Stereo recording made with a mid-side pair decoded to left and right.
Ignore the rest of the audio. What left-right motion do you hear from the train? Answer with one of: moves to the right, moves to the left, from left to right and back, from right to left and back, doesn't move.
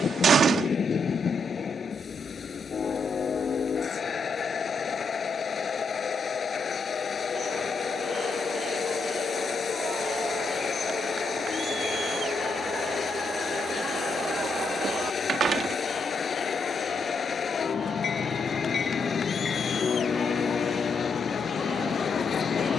doesn't move.